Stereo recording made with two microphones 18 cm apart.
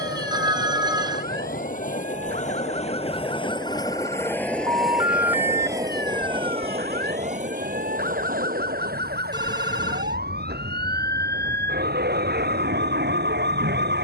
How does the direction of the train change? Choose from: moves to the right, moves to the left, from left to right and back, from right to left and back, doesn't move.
moves to the right.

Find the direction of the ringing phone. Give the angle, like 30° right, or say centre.
20° right.